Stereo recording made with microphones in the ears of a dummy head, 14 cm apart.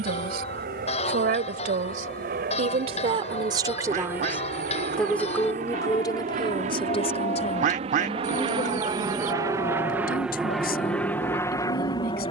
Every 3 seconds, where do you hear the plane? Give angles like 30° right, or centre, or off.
70° right, 60° right, 40° right, centre.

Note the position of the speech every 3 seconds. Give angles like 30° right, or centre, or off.
60° right, 10° right, 40° left, 60° left.